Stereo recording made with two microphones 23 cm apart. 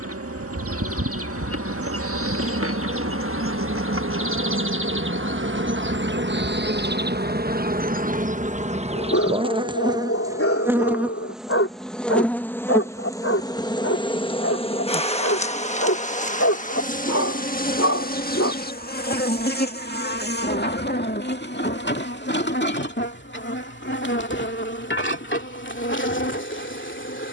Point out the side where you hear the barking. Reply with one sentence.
You can hear the barking on the left.